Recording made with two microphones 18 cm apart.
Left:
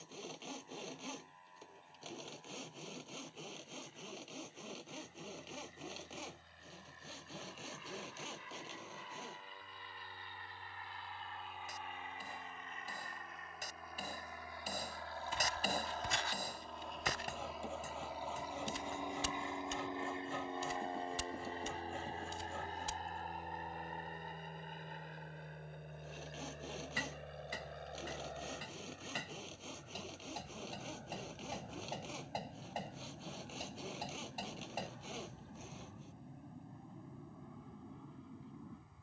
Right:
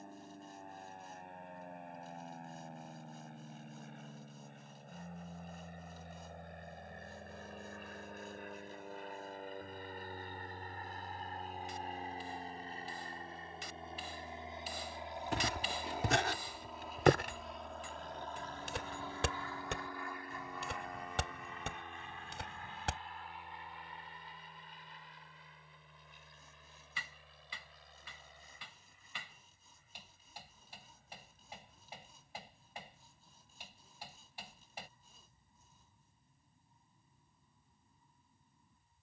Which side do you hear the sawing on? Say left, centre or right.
left.